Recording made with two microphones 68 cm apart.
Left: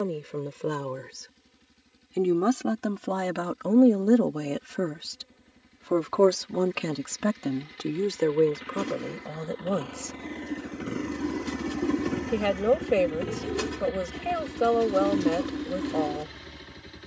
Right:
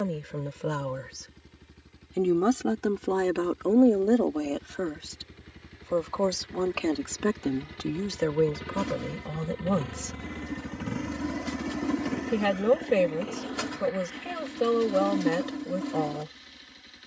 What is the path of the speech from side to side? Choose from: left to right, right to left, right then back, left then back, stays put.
left then back.